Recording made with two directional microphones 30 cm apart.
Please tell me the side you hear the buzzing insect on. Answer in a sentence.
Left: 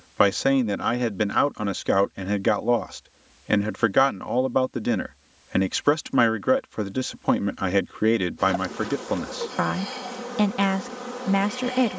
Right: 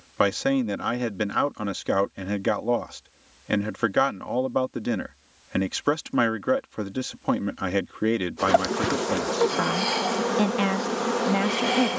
In this clip you hear the buzzing insect on the right.